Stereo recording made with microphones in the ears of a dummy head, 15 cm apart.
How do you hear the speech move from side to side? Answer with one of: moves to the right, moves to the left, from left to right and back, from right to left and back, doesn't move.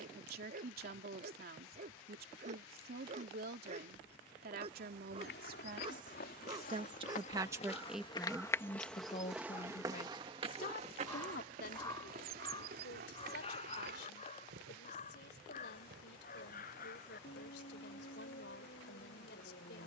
moves to the left.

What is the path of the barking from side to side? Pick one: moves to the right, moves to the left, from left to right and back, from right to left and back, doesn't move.
moves to the left.